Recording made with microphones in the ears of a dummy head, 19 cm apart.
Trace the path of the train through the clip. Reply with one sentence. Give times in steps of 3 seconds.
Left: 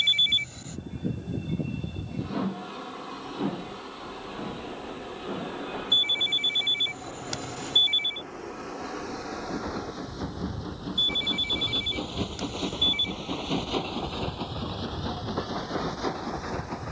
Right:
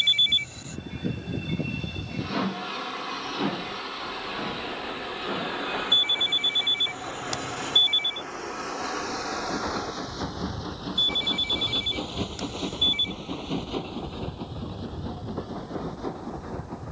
In this clip you hear the train on the right from 0 s and on the left from 12 s.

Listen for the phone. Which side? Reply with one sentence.
In this clip you hear the phone in the centre.